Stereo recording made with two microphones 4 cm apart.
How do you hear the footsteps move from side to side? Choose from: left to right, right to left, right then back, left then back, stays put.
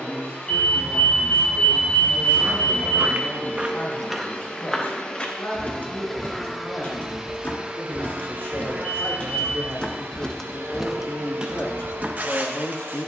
left then back.